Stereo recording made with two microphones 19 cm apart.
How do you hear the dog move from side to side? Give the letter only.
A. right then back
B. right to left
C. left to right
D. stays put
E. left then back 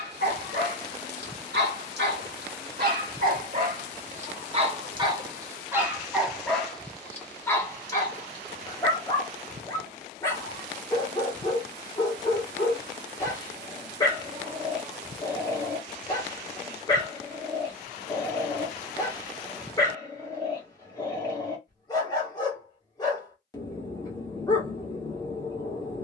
B.